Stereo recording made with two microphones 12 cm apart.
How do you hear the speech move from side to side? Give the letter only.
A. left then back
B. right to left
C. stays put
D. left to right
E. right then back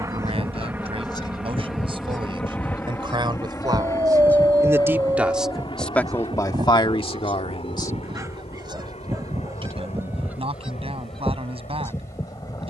A.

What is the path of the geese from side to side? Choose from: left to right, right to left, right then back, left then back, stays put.
right then back.